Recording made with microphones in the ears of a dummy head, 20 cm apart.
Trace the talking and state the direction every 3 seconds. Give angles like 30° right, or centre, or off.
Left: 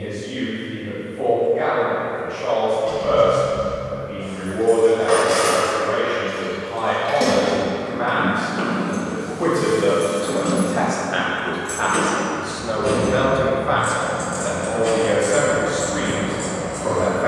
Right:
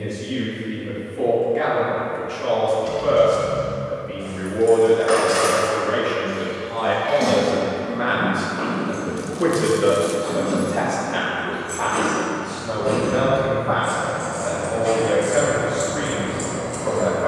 60° right, 60° right, 40° right, centre, 40° left, 60° left.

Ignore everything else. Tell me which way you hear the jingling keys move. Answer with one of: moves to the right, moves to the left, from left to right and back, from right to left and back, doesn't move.
from right to left and back.